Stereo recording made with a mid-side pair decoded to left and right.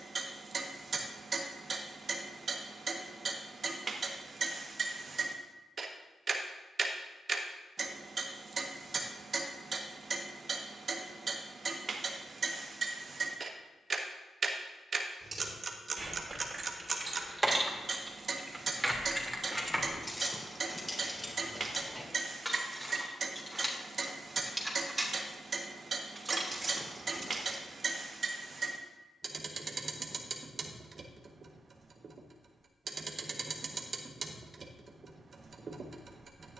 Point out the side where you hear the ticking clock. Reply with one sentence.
You can hear the ticking clock on the right.